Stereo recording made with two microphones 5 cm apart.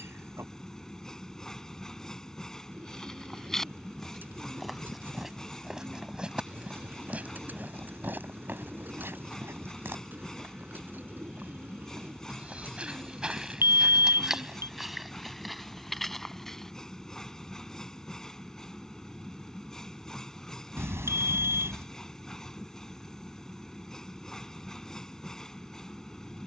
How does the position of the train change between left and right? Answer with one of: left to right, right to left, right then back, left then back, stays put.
stays put.